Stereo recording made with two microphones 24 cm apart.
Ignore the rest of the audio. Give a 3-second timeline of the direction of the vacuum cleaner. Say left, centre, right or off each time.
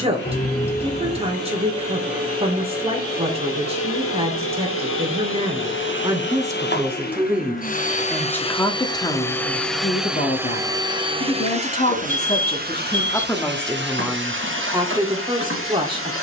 left, left, left, centre, right, right.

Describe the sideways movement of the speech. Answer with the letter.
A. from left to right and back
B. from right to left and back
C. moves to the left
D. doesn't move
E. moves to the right
B.